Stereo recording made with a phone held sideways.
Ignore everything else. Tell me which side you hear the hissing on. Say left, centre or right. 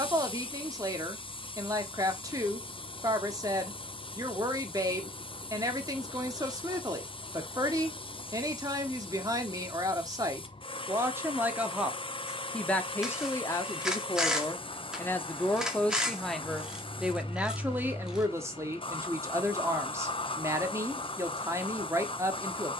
left.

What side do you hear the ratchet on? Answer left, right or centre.
centre.